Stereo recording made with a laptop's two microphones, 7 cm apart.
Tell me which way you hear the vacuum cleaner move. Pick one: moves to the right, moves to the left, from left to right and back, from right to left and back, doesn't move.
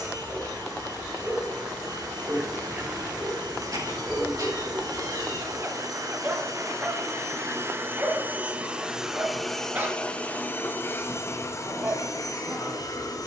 moves to the left.